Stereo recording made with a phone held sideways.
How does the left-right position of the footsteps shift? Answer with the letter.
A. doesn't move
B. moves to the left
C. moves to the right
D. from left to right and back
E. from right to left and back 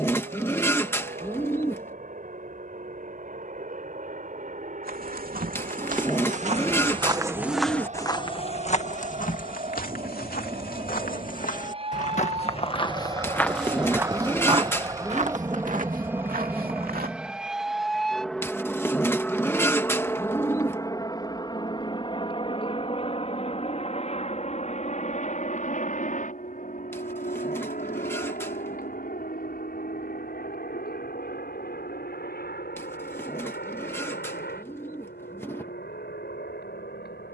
E.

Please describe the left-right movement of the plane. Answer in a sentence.
In this clip you hear the plane move from right to left.